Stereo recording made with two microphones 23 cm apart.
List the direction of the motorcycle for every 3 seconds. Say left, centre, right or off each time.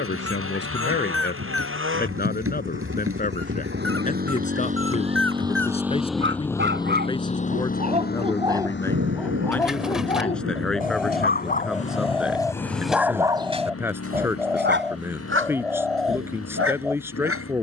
right, right, left, left, left, left.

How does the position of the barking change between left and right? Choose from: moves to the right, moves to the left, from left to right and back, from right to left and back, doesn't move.
from right to left and back.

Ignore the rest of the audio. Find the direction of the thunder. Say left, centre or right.
right.